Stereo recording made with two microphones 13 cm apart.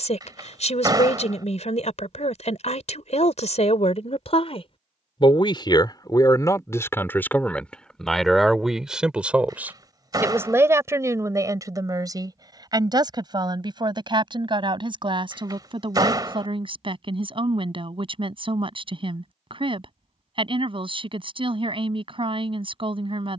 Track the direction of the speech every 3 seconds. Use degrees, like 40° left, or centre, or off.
60° left, 50° left, 10° left, 20° right, 30° right, 40° right, 40° right, 40° right.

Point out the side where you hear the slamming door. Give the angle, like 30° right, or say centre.
30° right.